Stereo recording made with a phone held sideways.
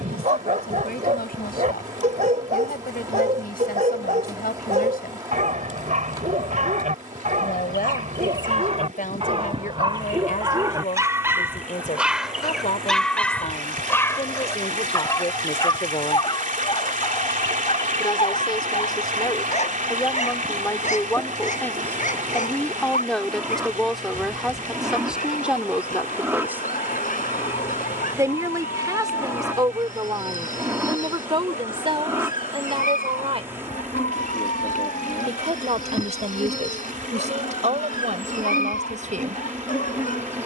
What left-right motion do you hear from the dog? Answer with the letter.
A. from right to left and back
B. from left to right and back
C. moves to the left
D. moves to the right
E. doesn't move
C.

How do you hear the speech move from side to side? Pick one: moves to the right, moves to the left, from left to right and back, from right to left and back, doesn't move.
moves to the right.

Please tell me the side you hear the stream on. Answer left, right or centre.
right.